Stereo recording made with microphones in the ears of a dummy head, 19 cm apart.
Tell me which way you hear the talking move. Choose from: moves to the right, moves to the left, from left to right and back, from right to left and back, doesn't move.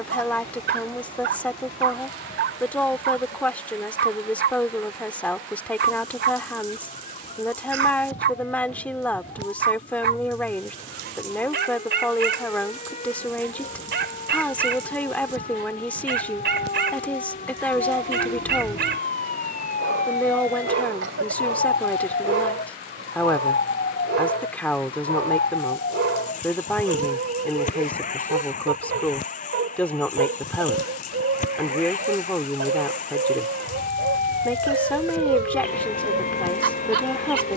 doesn't move.